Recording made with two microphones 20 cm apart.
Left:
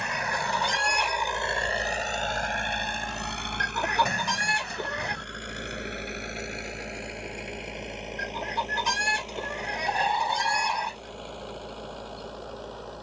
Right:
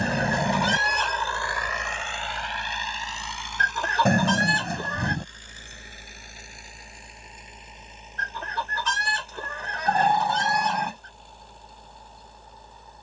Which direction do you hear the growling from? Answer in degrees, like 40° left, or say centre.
60° right.